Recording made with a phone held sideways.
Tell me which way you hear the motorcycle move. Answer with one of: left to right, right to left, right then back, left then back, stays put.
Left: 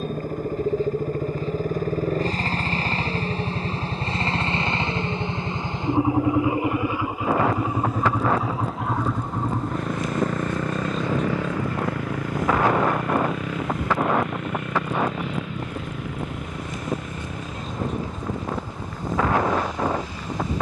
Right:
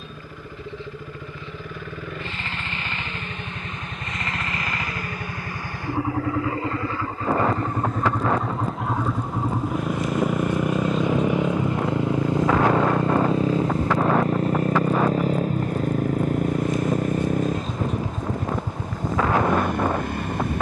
left to right.